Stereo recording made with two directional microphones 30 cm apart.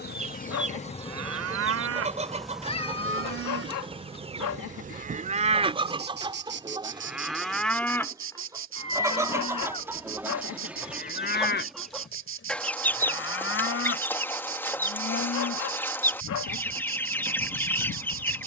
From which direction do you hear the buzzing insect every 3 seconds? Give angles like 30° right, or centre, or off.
10° left, 20° right, 40° right, 40° right, 40° right, 40° right.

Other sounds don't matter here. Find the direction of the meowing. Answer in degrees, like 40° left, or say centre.
20° left.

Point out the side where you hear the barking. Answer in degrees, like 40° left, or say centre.
70° left.